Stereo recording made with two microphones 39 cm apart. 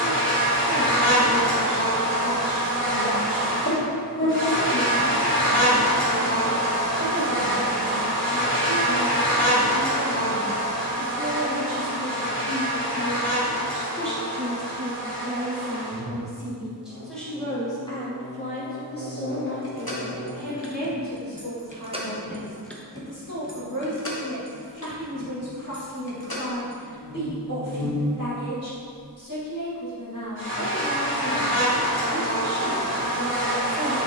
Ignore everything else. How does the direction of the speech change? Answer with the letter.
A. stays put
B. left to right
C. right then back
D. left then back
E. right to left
E.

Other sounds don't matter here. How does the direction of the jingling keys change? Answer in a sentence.
You can hear the jingling keys move from left to right and back again.